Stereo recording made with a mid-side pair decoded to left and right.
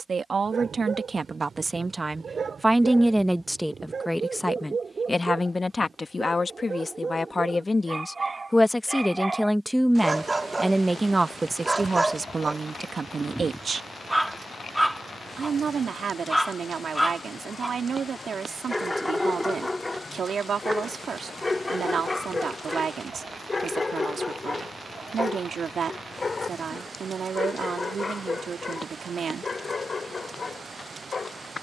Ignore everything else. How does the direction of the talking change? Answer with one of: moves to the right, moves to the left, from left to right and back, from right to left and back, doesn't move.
from right to left and back.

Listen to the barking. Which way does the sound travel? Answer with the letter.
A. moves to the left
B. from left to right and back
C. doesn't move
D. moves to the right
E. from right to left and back
A.